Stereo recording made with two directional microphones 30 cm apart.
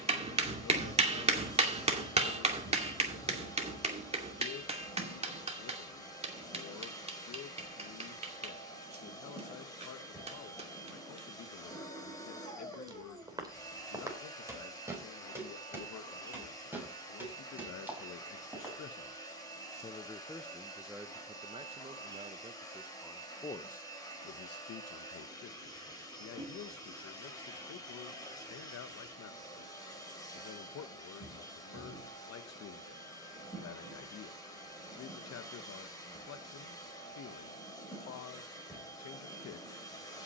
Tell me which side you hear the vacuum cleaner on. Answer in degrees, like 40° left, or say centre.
10° left.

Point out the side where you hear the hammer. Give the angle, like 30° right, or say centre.
20° right.